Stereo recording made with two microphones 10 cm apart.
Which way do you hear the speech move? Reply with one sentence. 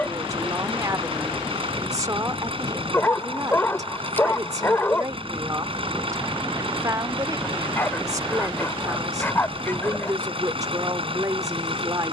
You can hear the speech stay in one place.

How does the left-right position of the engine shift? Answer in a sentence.
You can hear the engine stay in one place.